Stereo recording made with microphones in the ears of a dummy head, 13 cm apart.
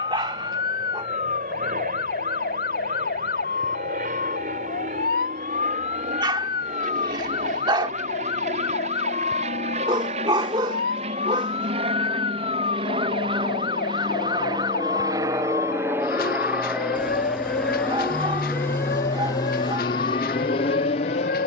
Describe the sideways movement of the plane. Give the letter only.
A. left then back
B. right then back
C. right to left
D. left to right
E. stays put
C.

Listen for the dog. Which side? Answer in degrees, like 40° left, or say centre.
30° right.